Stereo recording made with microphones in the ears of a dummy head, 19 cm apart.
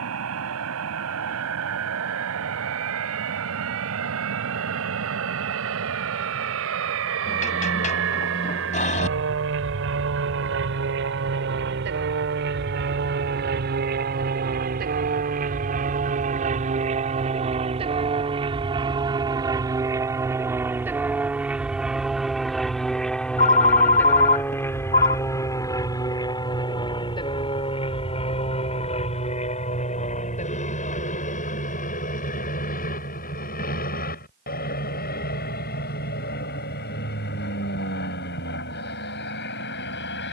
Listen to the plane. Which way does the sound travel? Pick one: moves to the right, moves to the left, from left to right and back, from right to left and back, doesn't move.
moves to the left.